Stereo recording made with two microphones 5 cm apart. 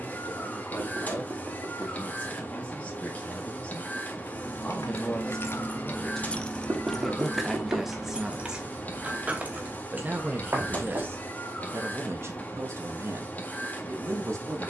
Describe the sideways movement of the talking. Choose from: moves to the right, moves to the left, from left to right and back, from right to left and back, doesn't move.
moves to the right.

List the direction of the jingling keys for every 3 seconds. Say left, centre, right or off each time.
off, left, centre, right, off.